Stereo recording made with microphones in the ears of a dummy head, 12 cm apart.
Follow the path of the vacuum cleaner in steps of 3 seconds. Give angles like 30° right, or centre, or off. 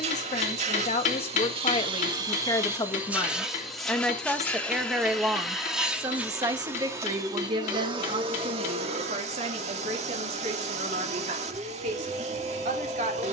40° right, centre, 30° right, 50° right, 50° right.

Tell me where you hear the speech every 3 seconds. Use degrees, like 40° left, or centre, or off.
40° left, centre, 40° right, 50° right, 60° right.